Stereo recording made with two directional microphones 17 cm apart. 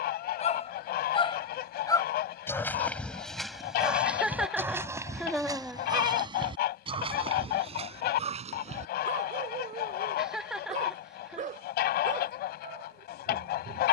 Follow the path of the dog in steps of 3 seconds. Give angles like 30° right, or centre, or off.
20° left, 10° right, 30° right, 50° right, 50° right.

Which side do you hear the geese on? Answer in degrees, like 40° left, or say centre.
70° left.